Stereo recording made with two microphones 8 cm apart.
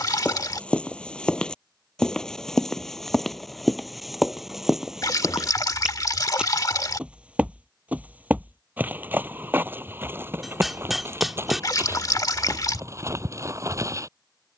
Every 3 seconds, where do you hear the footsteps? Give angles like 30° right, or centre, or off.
10° left, centre, 20° right, 30° right, 40° right.